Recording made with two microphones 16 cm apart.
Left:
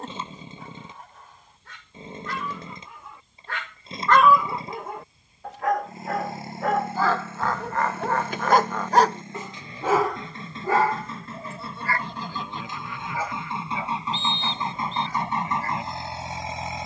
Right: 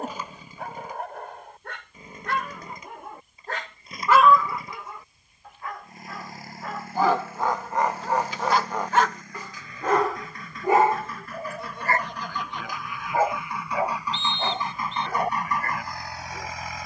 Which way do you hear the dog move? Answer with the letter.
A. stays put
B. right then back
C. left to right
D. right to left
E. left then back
E.